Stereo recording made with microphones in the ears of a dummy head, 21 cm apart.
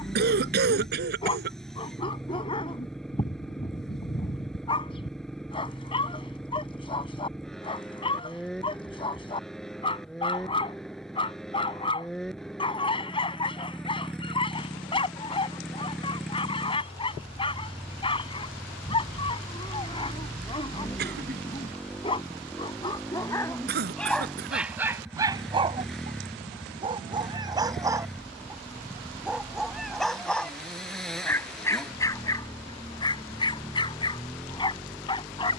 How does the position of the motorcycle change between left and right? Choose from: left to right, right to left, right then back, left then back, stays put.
stays put.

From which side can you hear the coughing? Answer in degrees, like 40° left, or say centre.
50° right.